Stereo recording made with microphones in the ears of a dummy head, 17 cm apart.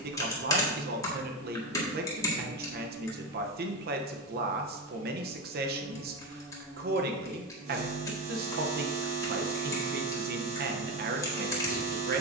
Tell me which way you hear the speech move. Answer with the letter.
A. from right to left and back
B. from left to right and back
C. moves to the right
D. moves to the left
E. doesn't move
E.